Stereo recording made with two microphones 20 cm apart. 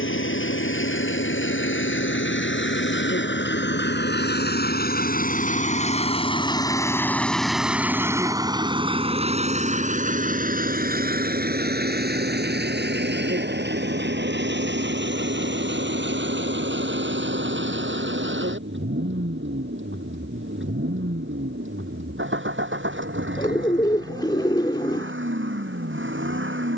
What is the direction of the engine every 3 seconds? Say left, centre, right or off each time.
left, left, centre, right, right, right, right, right, right.